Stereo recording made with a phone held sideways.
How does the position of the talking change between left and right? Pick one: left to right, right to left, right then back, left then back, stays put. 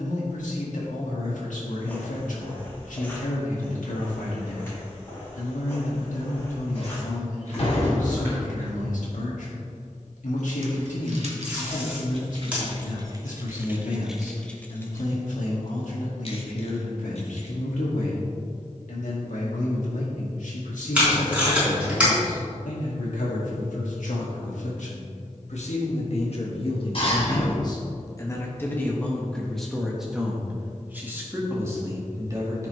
left to right.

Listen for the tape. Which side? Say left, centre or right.
centre.